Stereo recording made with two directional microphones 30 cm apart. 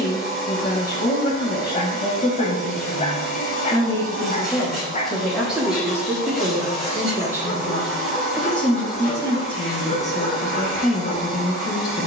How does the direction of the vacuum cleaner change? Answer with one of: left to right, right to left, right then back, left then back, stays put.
stays put.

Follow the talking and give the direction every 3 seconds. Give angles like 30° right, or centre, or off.
30° left, centre, 10° right, 20° left.